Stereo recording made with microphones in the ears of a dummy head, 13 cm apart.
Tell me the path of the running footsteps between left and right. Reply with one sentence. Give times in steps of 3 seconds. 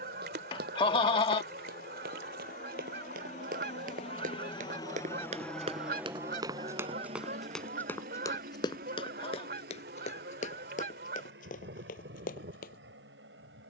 You can hear the running footsteps on the right from 0 s, in the centre from 6 s and on the left from 9 s.